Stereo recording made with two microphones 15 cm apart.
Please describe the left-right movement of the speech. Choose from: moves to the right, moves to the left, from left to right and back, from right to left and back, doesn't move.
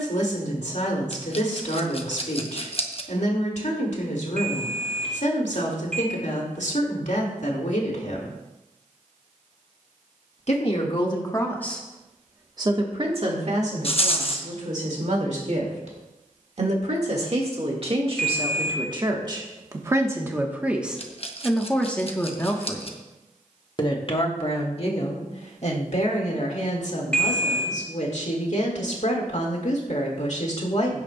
from left to right and back.